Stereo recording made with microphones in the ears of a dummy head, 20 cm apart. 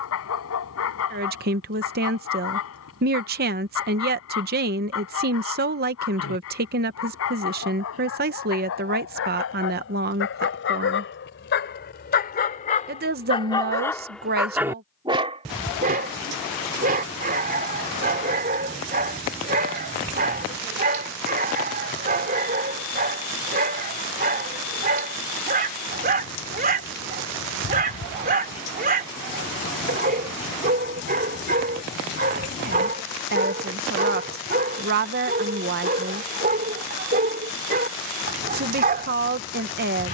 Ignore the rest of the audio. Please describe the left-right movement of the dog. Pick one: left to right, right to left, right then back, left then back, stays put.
left to right.